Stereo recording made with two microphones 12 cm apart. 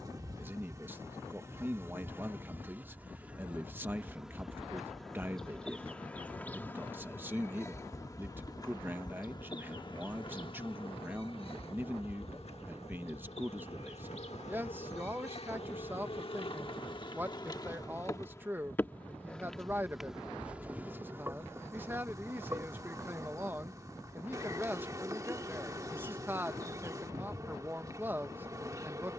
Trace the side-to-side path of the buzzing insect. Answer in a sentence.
You can hear the buzzing insect move from right to left and back again.